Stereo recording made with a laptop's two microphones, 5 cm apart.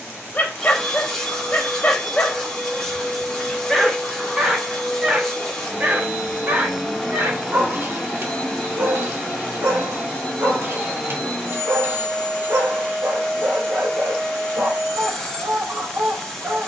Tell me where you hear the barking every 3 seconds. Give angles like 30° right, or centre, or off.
30° left, 10° right, 50° right, 50° right, 50° right, 50° right.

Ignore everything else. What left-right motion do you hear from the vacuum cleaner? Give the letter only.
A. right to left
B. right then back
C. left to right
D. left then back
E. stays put
E.